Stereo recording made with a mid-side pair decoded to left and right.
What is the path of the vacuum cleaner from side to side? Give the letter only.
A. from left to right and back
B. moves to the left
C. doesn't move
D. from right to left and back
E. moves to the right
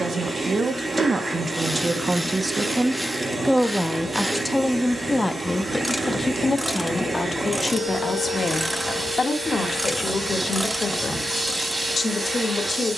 C.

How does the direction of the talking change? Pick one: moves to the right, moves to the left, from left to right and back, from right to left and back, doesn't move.
moves to the left.